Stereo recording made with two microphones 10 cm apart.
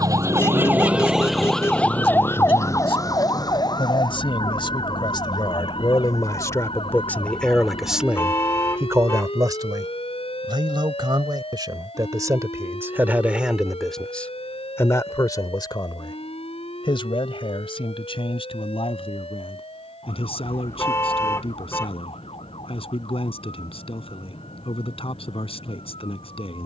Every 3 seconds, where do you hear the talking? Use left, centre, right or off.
left, left, centre, right, centre, left, left, left, left.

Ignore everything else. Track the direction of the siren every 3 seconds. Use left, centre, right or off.
centre, left, left, left, left, left, left, left, left.